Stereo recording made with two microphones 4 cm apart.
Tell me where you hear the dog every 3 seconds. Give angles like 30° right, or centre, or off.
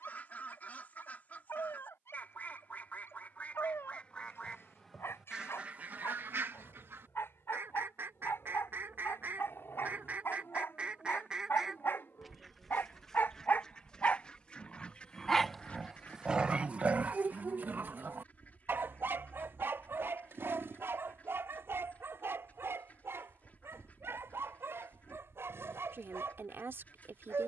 80° left, 80° left, 80° left, 70° left, 50° left, 30° right, 70° right, 80° right, 80° right.